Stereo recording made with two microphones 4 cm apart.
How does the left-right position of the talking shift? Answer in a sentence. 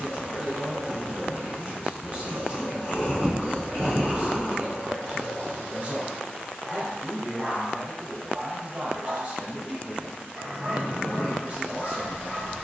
You can hear the talking stay put.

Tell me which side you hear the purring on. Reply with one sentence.
In this clip you hear the purring on the left.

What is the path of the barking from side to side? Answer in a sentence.
In this clip you hear the barking go right and come back.